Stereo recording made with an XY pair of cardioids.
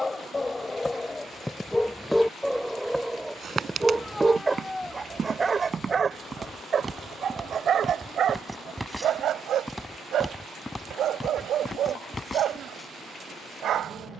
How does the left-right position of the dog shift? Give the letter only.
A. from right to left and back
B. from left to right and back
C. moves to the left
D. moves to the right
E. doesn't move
D.